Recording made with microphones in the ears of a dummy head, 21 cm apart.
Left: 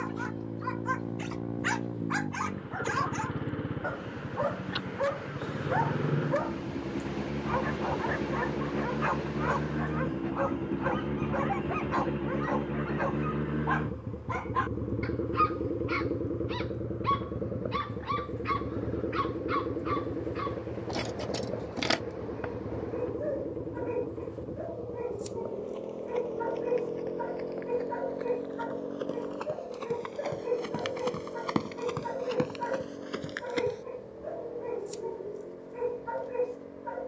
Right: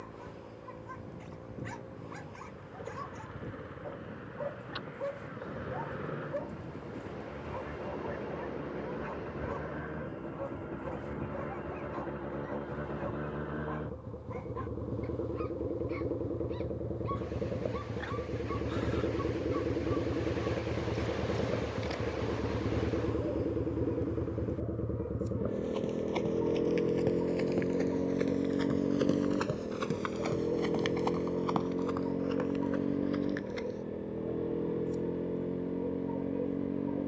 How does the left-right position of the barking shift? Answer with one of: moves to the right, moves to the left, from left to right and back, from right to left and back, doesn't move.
doesn't move.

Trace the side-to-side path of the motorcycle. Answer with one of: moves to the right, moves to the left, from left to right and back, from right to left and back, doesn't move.
moves to the right.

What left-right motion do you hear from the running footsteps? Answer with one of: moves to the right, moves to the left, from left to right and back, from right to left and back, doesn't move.
moves to the left.